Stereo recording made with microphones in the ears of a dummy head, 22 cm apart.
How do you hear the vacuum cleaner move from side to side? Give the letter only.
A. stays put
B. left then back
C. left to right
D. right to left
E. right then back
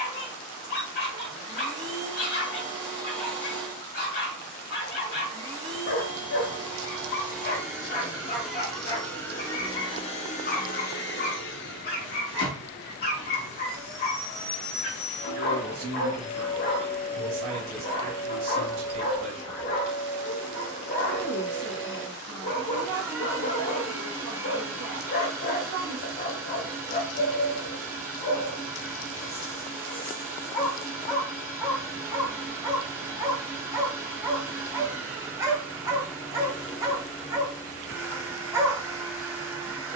B.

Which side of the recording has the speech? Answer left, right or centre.
right.